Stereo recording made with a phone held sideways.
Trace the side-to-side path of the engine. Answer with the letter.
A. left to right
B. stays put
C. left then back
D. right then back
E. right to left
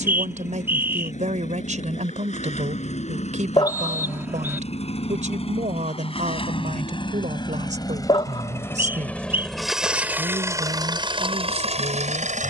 A.